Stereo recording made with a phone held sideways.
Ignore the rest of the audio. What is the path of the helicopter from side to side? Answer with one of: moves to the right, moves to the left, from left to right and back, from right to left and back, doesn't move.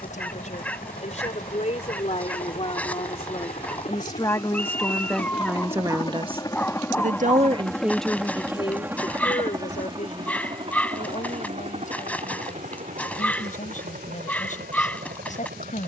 moves to the right.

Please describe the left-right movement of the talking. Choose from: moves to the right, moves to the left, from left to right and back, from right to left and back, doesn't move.
from left to right and back.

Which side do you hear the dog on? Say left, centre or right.
centre.